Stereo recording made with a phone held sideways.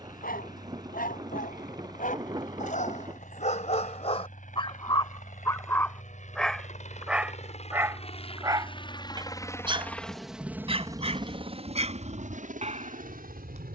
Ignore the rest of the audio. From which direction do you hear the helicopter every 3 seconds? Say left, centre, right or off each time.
left, left, left, centre, right.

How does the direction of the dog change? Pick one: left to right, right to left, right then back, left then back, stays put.
left to right.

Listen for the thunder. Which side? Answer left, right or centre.
right.